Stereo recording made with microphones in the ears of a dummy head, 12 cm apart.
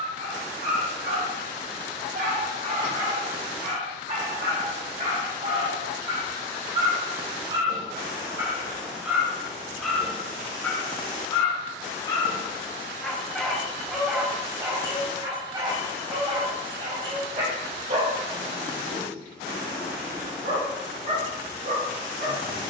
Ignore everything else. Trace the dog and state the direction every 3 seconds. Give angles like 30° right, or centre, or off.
70° right, 60° right, 30° right, 10° left, centre, 40° right, 60° right, 70° right.